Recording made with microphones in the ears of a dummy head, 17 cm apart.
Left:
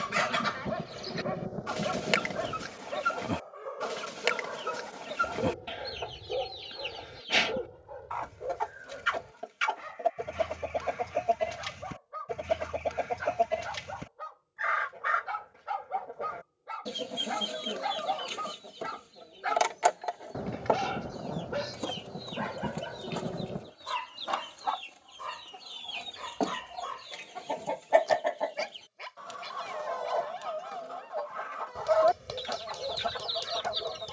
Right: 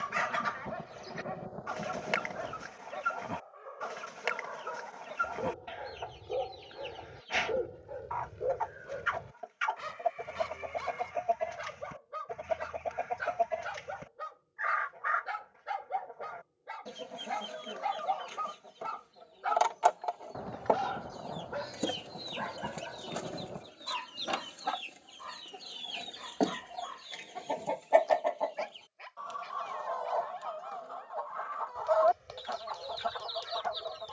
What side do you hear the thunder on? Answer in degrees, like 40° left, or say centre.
30° left.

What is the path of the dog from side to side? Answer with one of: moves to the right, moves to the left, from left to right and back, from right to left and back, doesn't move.
from left to right and back.